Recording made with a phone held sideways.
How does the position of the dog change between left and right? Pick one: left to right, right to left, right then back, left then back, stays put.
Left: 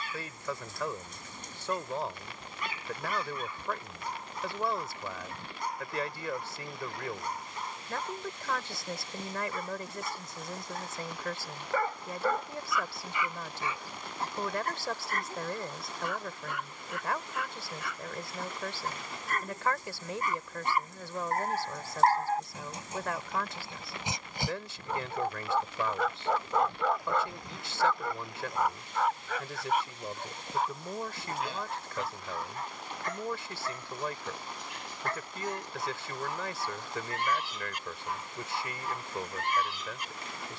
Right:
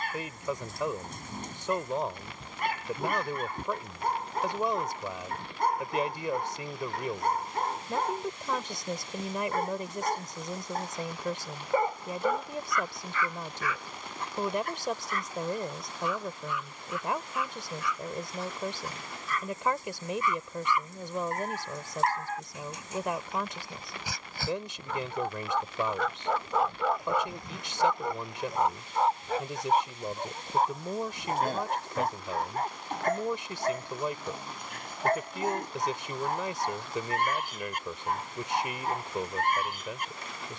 left then back.